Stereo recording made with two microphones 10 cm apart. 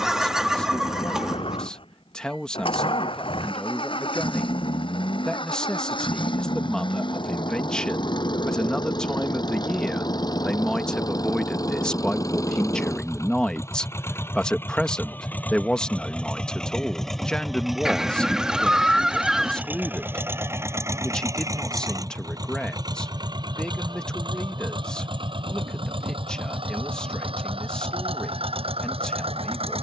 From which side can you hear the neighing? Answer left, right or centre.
centre.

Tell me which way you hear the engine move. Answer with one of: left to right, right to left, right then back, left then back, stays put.
left to right.